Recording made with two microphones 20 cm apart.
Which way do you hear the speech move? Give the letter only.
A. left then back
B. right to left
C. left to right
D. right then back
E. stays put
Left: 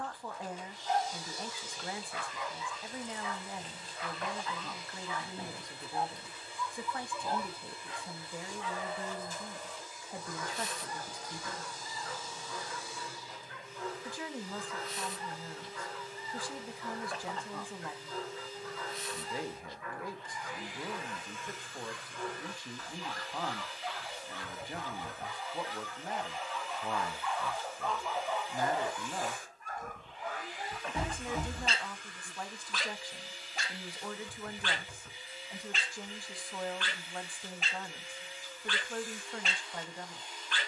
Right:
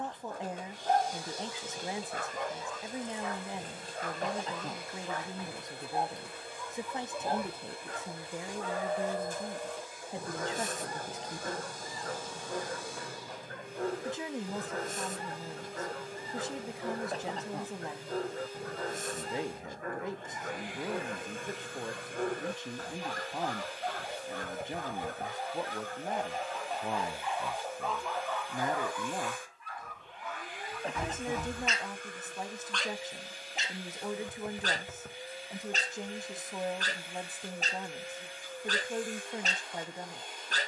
E.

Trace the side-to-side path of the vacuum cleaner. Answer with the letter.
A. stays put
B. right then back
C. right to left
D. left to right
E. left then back
A.